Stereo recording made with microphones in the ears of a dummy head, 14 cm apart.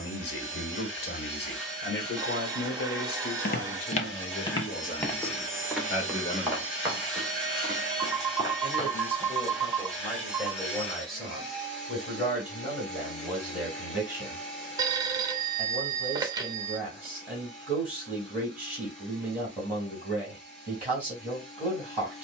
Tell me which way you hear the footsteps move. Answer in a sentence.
You can hear the footsteps move from left to right.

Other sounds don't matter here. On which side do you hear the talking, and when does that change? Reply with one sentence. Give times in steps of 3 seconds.
You can hear the talking on the left from 0 s and in the centre from 9 s.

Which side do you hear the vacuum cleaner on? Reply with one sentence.
You can hear the vacuum cleaner in the centre.